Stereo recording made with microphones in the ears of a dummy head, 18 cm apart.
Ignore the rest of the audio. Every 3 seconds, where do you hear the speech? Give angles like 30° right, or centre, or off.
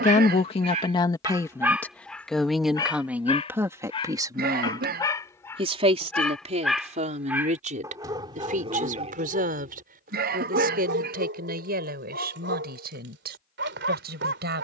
20° left, 20° right, 40° right, 50° right, 50° right.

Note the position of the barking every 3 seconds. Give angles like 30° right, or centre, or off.
10° right, 20° left, 10° right, 50° right, 60° right.